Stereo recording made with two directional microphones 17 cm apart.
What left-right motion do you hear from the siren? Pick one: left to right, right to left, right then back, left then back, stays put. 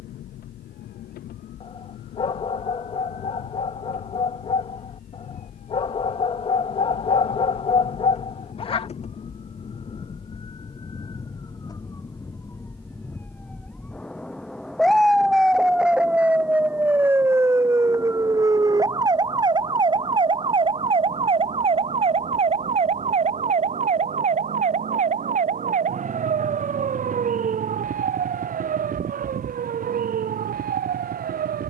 left to right.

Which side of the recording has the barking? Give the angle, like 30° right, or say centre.
30° left.